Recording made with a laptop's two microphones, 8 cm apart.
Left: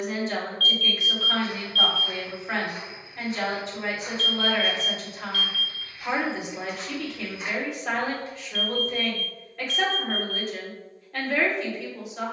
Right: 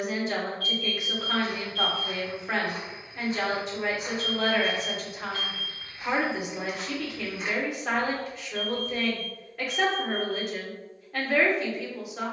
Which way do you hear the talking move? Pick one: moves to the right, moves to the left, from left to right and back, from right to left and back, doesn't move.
doesn't move.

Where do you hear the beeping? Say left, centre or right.
right.